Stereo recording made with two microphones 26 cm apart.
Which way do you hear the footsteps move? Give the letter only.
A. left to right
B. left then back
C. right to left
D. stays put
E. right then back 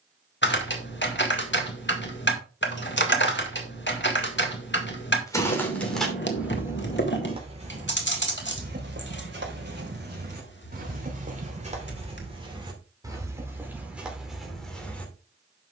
E.